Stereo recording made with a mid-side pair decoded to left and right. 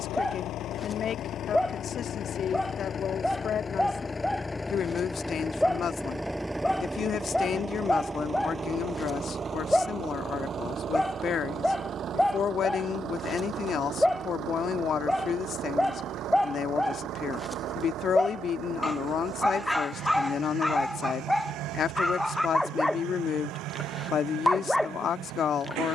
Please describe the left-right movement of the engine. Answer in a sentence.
You can hear the engine go from the left side to the right.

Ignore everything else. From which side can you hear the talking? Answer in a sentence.
You can hear the talking on the left.